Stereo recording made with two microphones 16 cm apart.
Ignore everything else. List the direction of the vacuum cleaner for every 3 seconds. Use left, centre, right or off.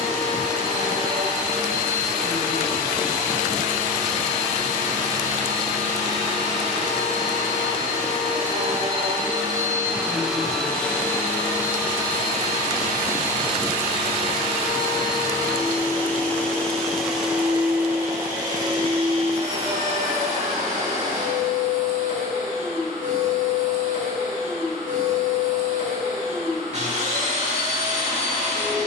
right, right, right, centre, left, centre, right, right, right, right.